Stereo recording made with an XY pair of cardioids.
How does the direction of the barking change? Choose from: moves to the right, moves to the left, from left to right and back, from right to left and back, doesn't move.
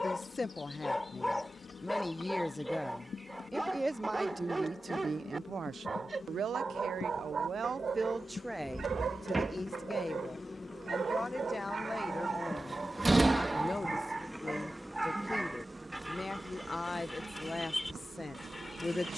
from left to right and back.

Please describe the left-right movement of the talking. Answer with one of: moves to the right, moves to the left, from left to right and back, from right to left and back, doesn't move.
from left to right and back.